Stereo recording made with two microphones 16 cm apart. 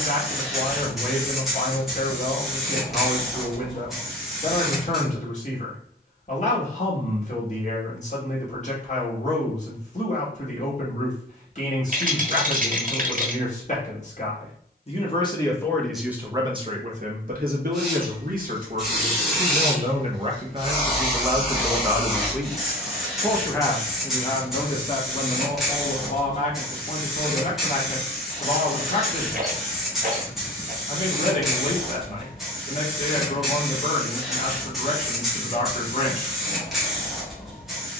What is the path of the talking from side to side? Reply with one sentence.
In this clip you hear the talking go right and come back.